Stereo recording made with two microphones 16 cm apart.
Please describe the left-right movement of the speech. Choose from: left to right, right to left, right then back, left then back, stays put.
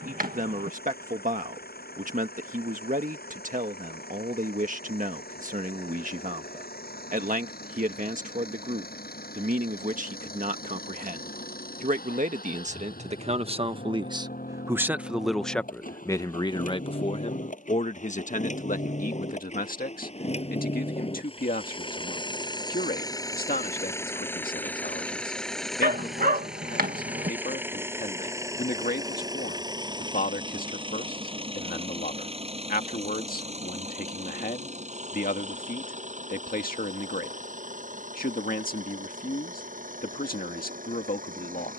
right to left.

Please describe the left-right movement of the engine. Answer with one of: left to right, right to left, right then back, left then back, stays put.
left to right.